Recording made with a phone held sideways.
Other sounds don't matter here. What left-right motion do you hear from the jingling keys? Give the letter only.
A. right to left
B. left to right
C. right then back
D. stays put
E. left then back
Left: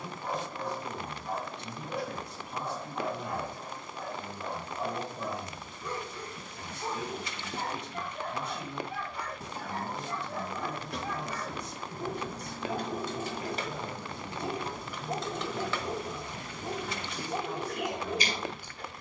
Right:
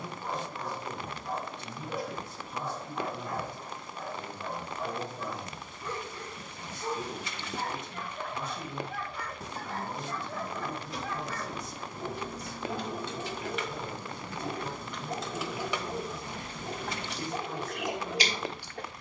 B.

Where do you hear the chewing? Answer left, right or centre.
right.